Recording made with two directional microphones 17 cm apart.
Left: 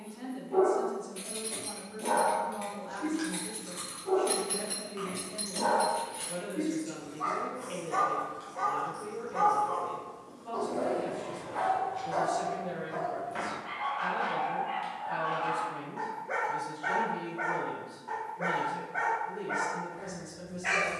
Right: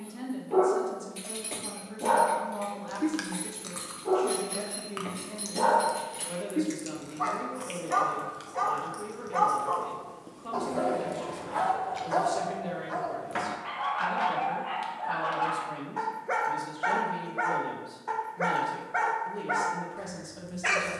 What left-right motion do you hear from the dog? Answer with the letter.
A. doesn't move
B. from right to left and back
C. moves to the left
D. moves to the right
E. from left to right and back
A.